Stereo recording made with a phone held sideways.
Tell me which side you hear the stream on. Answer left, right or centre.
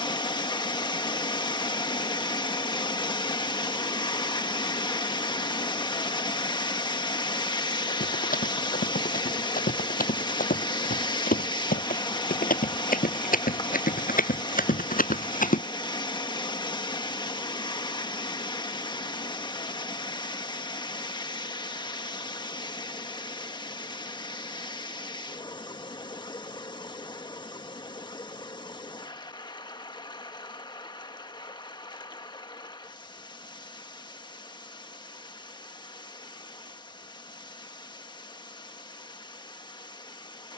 left.